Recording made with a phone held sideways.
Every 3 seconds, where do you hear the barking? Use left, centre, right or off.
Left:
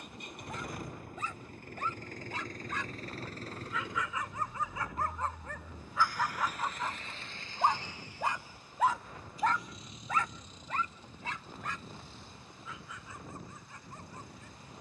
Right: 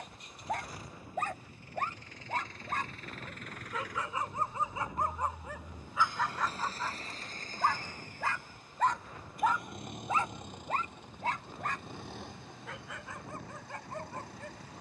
right, right, centre, right, right.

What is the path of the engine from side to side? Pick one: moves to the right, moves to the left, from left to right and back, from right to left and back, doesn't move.
moves to the right.